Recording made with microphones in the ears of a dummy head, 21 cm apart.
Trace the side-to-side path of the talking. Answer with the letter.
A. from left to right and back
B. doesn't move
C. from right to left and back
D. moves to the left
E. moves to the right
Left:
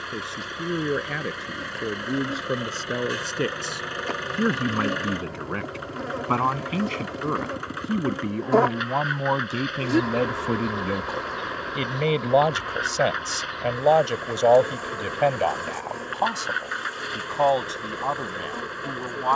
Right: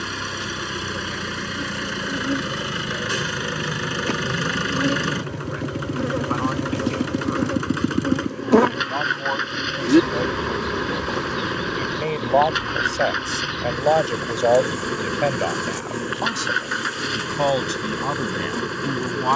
E.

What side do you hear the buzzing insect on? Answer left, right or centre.
right.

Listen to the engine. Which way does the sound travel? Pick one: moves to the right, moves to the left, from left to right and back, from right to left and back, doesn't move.
doesn't move.